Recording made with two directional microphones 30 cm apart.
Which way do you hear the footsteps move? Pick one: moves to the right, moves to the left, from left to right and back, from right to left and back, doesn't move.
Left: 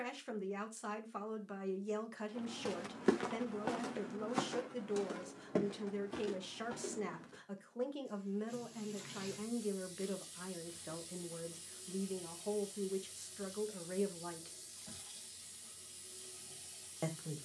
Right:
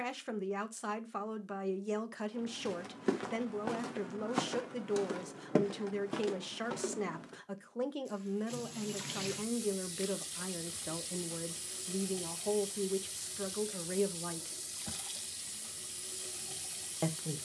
moves to the right.